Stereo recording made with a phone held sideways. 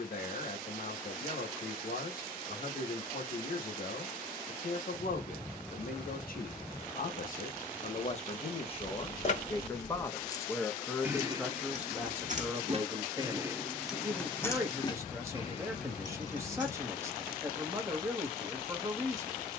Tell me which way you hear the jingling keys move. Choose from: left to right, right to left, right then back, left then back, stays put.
right then back.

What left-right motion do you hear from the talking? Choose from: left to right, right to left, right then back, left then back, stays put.
left to right.